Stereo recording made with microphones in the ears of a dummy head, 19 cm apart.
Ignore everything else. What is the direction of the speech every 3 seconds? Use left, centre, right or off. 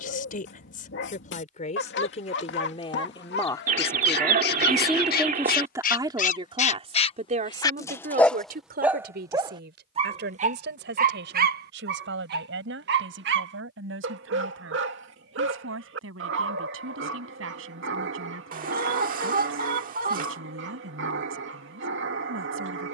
left, centre, right, right, right, right, right, right.